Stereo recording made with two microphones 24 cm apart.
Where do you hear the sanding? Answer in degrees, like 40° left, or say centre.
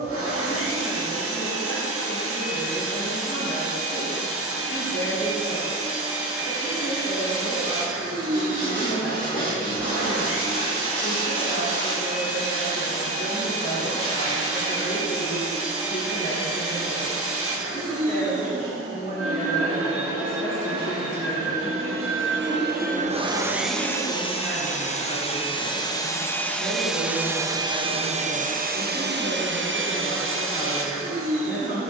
60° left.